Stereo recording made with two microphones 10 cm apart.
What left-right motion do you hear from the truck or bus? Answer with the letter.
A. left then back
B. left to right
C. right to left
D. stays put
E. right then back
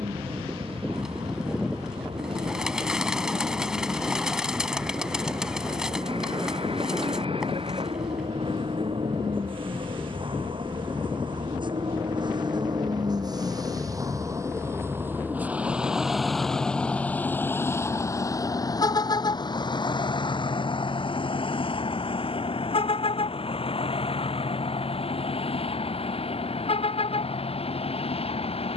C.